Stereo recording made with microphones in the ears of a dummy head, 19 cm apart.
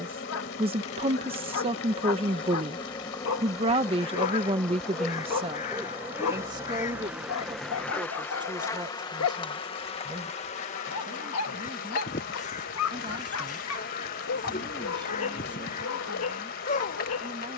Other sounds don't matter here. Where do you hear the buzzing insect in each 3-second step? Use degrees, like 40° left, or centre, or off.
30° left, 10° left, centre, 30° left, 40° left, 40° left.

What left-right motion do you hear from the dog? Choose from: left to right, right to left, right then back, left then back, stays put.
stays put.